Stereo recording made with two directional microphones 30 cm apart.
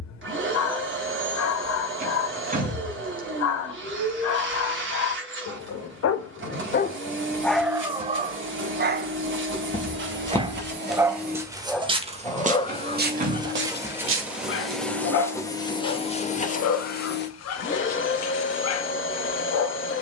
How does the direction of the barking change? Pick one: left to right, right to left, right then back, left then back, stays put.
right then back.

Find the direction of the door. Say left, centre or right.
right.